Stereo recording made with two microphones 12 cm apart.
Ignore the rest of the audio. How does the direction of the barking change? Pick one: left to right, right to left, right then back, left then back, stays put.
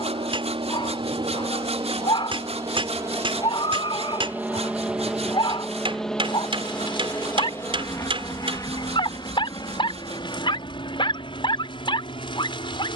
stays put.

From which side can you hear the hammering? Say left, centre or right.
right.